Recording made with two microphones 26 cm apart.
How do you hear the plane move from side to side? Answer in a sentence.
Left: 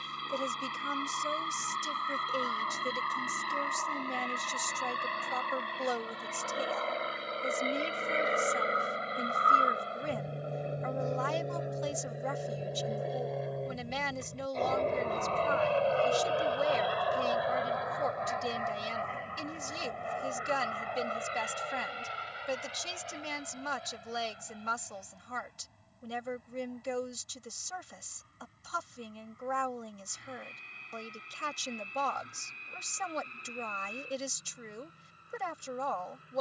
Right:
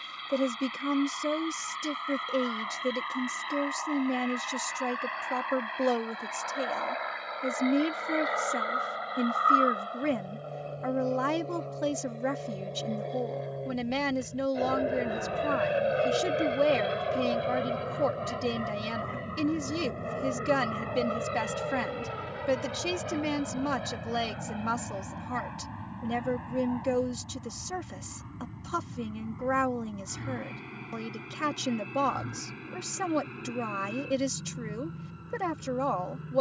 In this clip you hear the plane go from the left side to the right.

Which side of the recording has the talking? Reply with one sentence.
You can hear the talking on the right.